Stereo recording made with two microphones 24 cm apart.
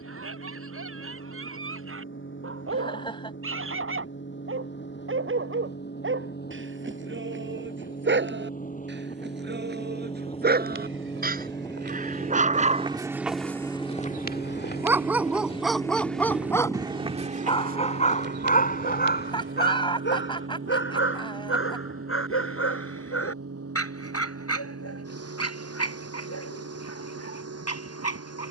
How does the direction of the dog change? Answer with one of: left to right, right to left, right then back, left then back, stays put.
right to left.